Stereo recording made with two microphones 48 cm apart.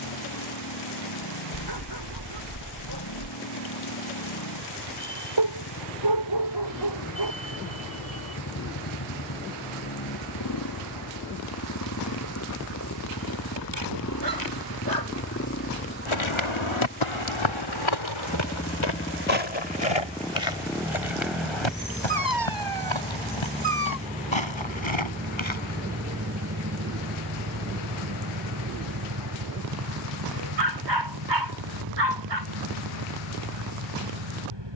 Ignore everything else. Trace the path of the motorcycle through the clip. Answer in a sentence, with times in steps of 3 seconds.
You can hear the motorcycle on the left from 0 s, in the centre from 18 s and on the right from 24 s.